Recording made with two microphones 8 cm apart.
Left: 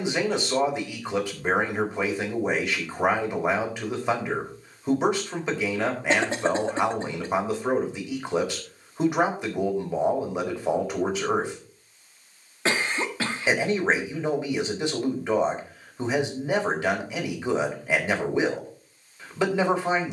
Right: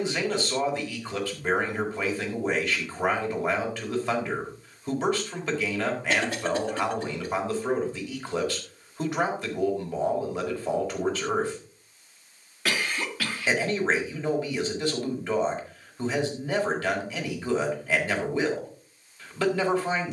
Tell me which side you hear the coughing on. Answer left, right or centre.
left.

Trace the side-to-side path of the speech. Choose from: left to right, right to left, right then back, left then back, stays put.
stays put.